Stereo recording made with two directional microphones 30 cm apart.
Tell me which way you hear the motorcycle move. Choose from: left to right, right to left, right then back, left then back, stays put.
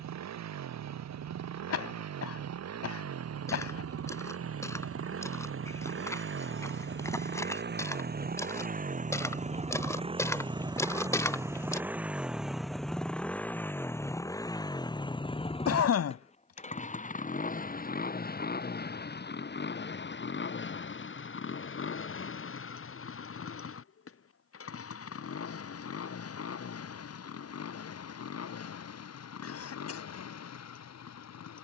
right to left.